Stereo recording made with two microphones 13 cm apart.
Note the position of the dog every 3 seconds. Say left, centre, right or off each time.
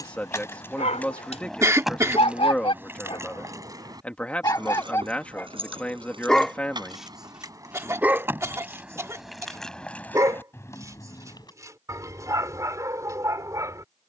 left, left, centre, right, right.